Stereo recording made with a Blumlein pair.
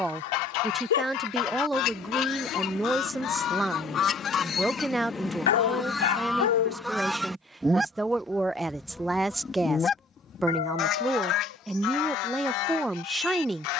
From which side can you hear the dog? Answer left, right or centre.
left.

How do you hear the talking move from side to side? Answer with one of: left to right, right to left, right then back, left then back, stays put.
stays put.